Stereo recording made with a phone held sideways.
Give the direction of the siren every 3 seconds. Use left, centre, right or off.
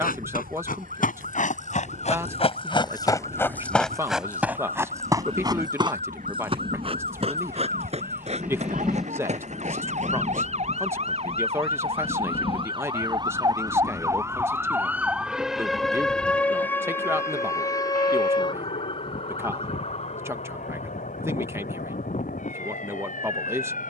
right, right, right, right, right, centre, left, left.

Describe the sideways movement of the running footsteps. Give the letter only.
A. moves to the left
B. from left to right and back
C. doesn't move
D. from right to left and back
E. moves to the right
E.